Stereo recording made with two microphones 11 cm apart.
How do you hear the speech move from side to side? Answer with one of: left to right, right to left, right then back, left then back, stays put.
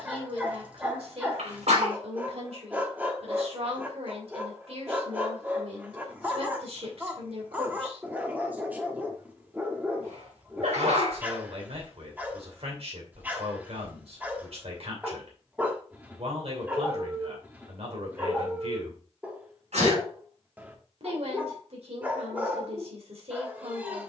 stays put.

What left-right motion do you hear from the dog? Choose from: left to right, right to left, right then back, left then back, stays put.
stays put.